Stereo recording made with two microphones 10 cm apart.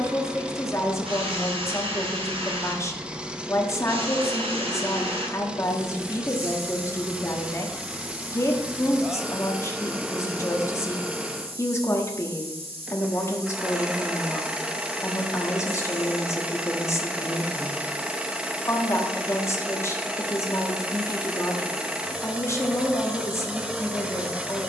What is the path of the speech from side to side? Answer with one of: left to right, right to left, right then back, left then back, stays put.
stays put.